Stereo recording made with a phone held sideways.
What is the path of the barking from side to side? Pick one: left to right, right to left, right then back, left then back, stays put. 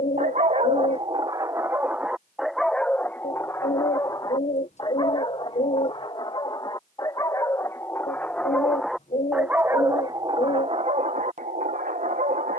left then back.